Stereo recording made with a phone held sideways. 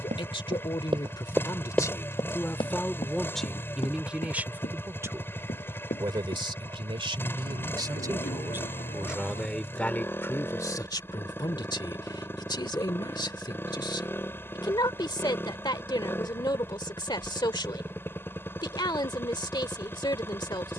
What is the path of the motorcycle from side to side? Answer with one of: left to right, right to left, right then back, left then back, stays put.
stays put.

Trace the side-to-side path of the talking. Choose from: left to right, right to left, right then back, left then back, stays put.
right then back.